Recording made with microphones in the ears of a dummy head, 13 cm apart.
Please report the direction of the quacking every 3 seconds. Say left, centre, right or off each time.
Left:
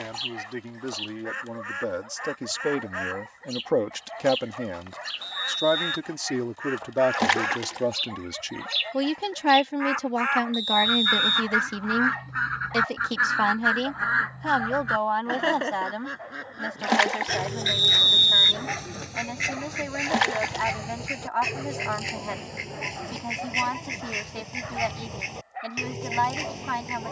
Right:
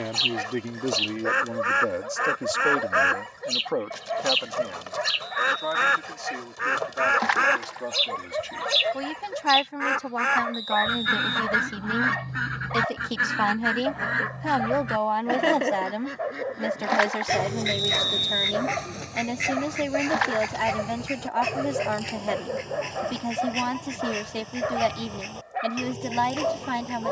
right, right, right, right, right, centre, centre, centre, centre.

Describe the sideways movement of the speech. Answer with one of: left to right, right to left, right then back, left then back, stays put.
left then back.